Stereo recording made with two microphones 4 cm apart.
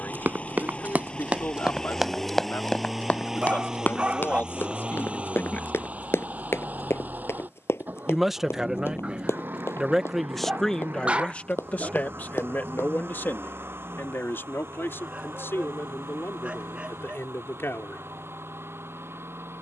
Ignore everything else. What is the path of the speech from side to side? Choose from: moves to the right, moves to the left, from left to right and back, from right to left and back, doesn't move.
from left to right and back.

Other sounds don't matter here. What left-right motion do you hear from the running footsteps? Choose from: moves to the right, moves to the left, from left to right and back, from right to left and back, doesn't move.
moves to the left.